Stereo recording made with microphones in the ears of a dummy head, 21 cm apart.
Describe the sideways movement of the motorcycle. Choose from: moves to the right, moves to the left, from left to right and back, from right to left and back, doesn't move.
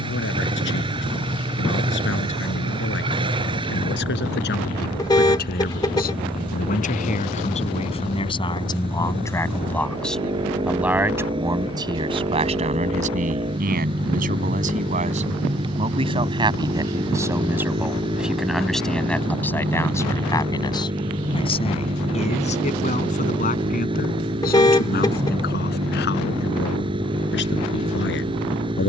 doesn't move.